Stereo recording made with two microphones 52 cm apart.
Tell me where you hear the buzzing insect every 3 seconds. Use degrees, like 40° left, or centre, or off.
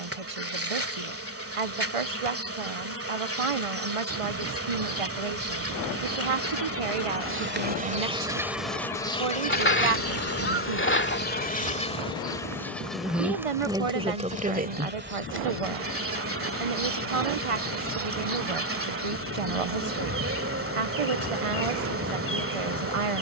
20° right, 20° right, 20° right, 20° left, centre, 20° right, 20° right, 20° right.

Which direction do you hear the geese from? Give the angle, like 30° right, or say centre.
20° left.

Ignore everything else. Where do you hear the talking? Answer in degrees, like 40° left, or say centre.
70° right.